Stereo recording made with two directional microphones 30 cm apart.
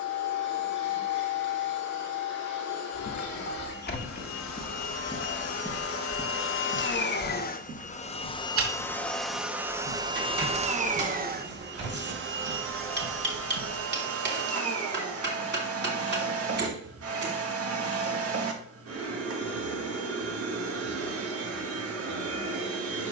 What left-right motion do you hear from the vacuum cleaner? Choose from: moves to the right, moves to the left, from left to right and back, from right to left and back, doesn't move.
moves to the right.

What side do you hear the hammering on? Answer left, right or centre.
right.